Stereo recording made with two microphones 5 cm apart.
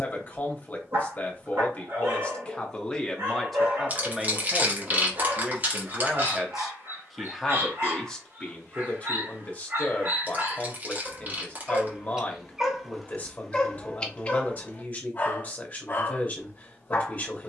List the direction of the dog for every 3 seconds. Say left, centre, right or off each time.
right, right, right, right, centre, left.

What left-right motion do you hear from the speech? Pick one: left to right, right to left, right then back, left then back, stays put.
right then back.